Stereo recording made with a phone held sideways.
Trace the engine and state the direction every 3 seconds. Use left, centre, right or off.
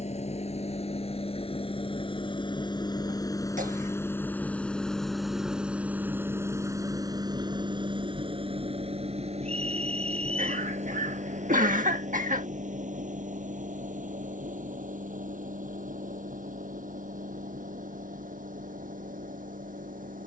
left, centre, right, right, right, right, right.